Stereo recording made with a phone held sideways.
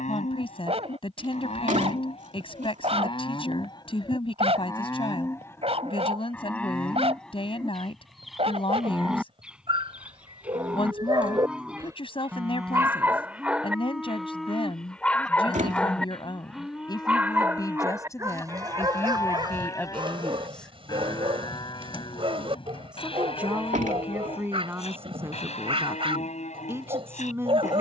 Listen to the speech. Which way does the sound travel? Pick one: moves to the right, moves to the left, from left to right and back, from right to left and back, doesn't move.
moves to the right.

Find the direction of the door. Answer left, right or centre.
right.